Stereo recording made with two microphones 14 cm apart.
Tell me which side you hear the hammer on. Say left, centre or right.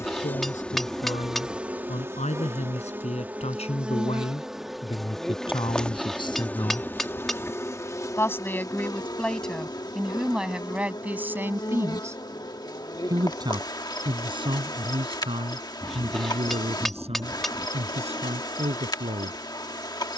centre.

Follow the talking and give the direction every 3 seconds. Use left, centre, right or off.
left, left, left, centre, right, right, right.